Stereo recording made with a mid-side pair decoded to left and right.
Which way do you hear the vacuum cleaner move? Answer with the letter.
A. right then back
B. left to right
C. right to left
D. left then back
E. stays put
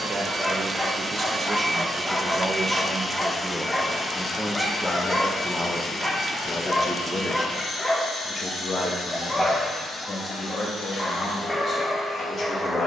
C.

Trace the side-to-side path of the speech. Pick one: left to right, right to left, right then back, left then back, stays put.
right to left.